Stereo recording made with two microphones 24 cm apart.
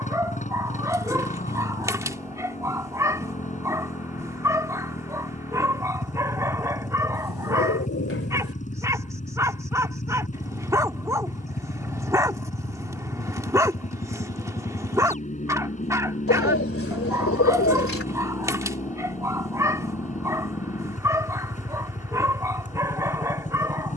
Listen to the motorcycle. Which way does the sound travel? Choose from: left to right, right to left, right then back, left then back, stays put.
stays put.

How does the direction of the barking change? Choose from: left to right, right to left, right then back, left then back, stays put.
stays put.